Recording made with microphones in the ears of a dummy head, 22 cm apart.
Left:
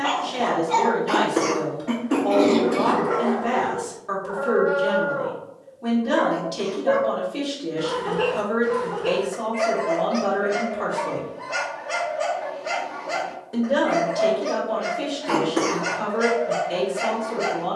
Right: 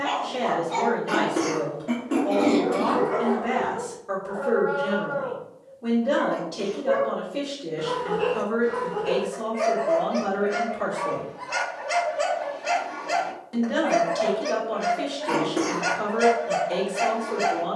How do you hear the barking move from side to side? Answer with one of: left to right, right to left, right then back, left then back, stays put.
left to right.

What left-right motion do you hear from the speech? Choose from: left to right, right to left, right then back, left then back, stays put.
left to right.